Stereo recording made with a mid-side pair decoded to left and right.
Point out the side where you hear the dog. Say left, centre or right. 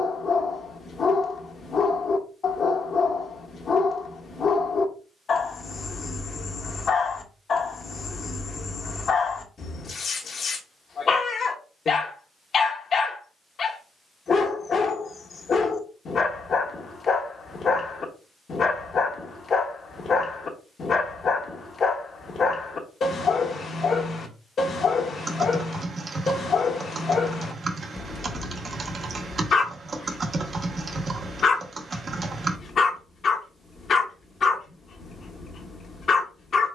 left.